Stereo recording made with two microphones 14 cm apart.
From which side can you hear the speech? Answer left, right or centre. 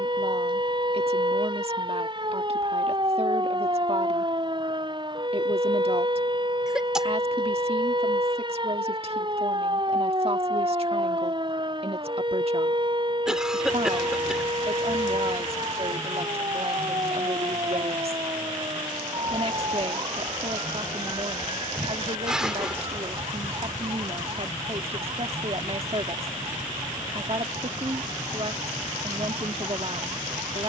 right.